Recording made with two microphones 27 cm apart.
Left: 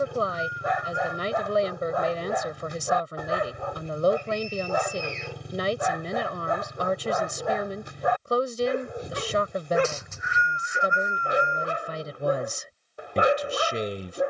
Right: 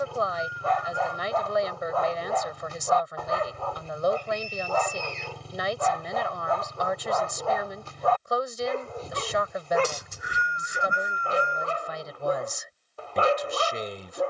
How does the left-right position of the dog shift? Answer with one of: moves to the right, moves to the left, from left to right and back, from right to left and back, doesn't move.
doesn't move.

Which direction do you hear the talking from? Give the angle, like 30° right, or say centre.
30° left.